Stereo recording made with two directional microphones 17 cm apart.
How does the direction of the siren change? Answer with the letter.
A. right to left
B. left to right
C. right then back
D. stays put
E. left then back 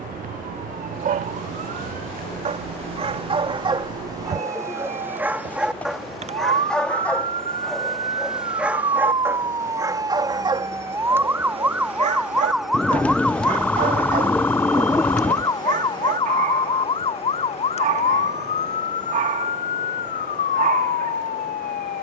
A.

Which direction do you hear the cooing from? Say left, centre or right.
centre.